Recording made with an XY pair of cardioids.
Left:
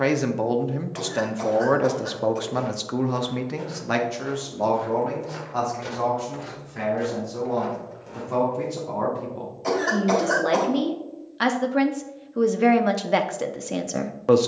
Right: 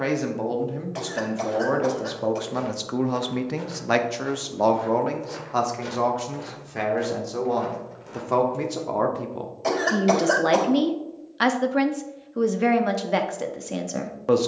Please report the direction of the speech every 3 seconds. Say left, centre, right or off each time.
left, right, right, right, centre.